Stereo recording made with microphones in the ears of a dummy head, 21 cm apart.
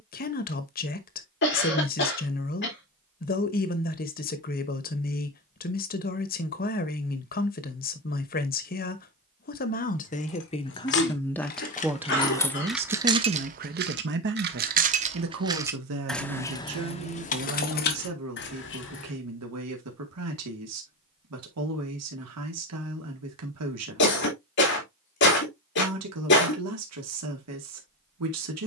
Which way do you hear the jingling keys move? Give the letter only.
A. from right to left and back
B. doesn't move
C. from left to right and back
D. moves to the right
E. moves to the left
C.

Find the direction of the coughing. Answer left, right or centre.
left.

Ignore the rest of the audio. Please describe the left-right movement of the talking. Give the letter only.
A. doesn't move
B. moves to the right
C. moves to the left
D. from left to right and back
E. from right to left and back
B.